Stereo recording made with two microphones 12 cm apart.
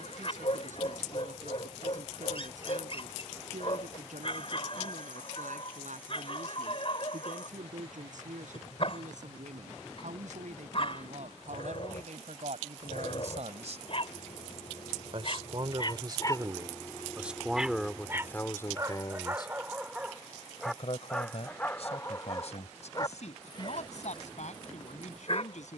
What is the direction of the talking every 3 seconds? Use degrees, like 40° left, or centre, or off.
80° right, 80° right, 80° right, 70° right, 70° right, 20° right, 30° left, 60° left, 70° left.